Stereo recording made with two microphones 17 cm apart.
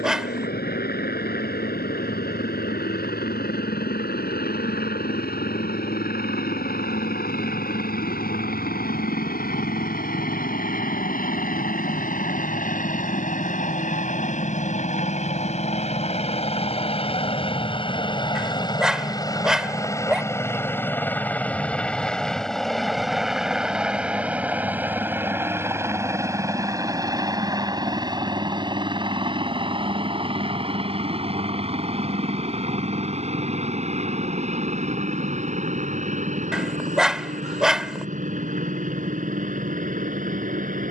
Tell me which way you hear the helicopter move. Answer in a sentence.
You can hear the helicopter move to the right.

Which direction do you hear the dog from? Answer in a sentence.
In this clip you hear the dog in the centre.